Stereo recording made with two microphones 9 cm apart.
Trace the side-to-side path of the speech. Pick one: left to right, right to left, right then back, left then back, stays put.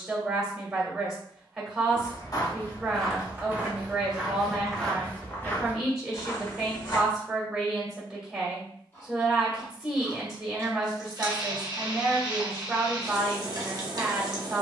stays put.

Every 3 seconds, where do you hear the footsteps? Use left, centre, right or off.
left, centre, left, off, off.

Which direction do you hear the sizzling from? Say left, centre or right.
right.